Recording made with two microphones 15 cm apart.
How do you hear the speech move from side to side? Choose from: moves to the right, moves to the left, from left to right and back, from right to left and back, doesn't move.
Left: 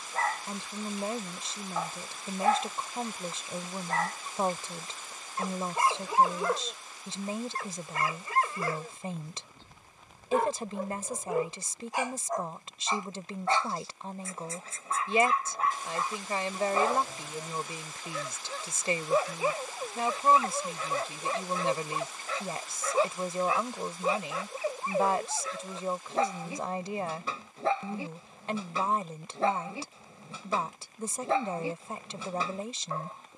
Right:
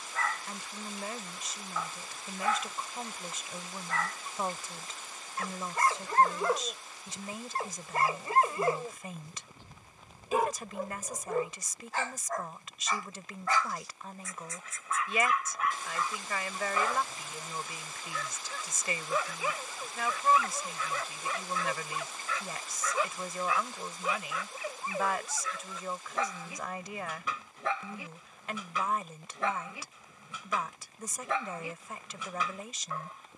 doesn't move.